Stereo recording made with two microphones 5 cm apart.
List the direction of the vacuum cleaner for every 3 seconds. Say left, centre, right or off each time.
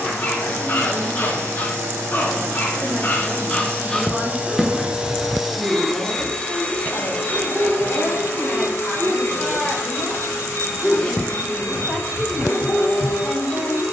right, right, left, left, left.